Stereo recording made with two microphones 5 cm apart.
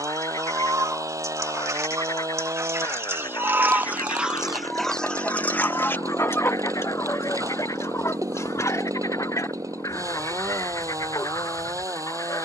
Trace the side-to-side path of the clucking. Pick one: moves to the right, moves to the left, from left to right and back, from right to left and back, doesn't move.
moves to the left.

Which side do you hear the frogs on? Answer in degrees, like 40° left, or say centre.
80° left.